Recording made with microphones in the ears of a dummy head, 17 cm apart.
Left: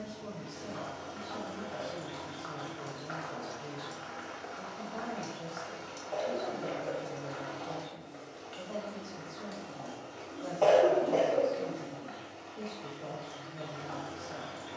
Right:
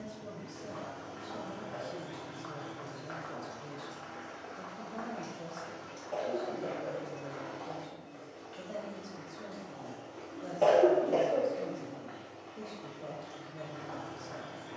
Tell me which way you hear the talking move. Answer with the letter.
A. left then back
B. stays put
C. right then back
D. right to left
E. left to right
B.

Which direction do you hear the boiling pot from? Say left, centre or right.
left.